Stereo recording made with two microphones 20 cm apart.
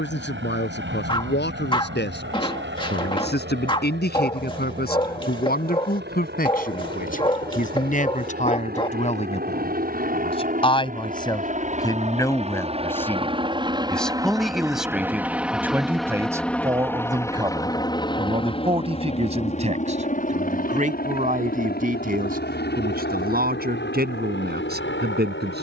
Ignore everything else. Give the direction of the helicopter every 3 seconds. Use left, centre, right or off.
right, right, right, right, right, centre, left, left, left.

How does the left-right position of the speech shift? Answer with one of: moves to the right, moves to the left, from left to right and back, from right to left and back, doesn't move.
moves to the right.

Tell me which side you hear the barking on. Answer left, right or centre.
left.